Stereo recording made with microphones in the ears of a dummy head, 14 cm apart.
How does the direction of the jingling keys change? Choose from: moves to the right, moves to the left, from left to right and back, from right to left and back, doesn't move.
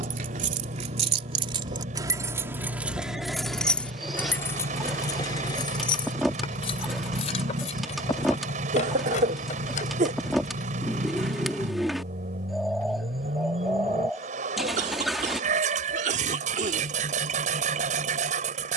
moves to the left.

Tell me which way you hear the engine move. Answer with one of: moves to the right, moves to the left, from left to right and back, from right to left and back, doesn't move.
doesn't move.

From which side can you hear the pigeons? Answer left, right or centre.
centre.